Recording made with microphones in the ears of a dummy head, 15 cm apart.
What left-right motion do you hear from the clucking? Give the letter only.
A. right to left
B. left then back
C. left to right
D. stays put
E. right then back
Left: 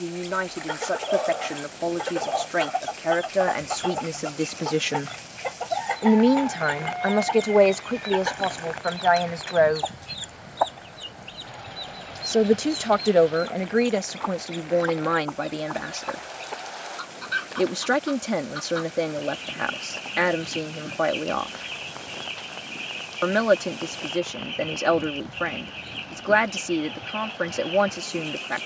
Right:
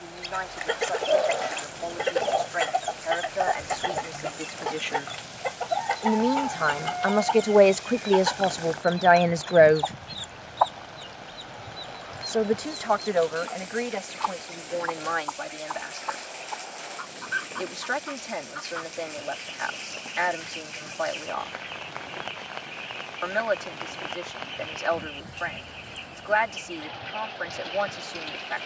A.